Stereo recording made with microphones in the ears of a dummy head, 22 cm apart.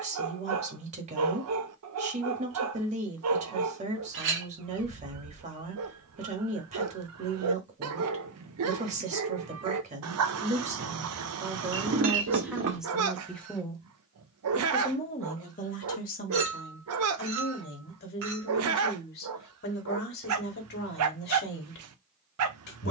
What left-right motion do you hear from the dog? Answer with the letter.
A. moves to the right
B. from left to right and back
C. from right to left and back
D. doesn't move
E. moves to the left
D.